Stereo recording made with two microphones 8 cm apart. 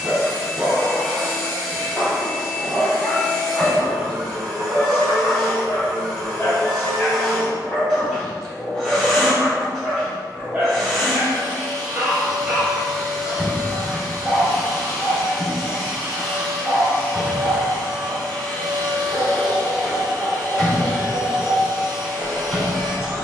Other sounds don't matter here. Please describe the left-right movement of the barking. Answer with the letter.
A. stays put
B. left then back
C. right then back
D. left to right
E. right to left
B.